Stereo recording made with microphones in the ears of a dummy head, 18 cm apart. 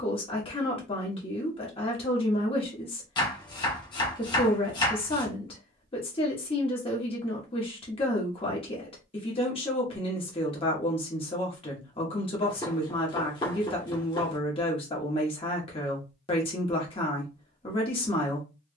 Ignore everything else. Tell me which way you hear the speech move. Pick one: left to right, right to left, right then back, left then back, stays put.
stays put.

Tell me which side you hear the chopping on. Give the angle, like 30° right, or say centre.
20° left.